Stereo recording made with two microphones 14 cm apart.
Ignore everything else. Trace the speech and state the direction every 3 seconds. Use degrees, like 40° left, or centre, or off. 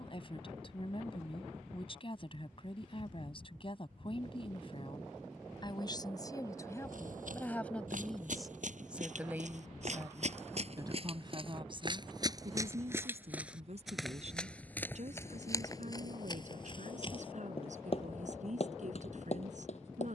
40° left, 40° left, 10° left, 20° right, 50° right, 60° right, 60° right.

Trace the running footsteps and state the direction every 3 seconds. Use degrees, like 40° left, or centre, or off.
off, off, 70° right, 50° right, 10° right, 30° left, 50° left.